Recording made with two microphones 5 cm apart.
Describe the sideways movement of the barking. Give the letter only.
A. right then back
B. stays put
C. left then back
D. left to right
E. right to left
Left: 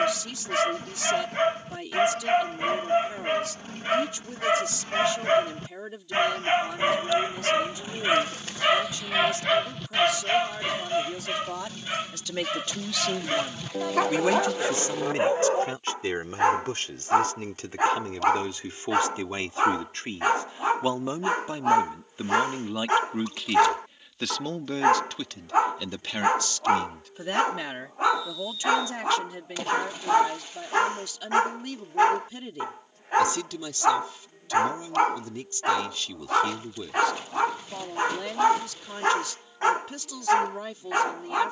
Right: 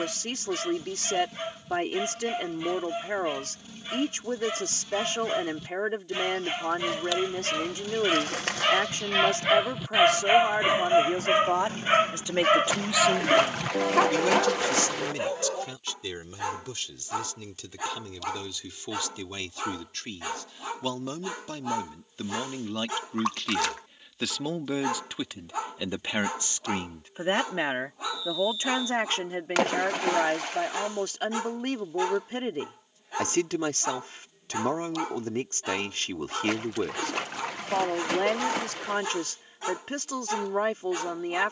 A.